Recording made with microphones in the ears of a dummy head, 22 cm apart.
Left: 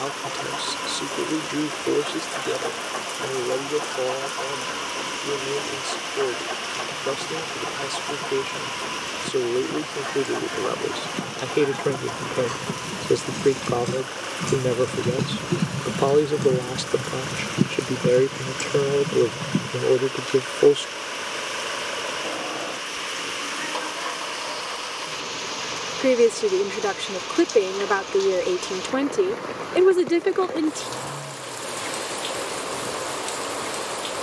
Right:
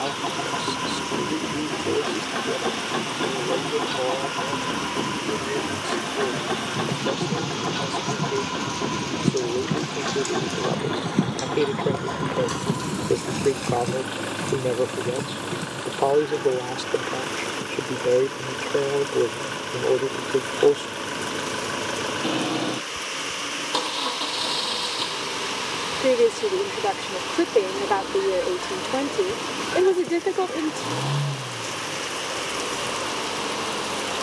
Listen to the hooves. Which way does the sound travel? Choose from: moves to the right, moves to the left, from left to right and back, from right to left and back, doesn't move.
moves to the left.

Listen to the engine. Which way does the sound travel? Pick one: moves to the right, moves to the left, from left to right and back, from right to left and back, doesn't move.
doesn't move.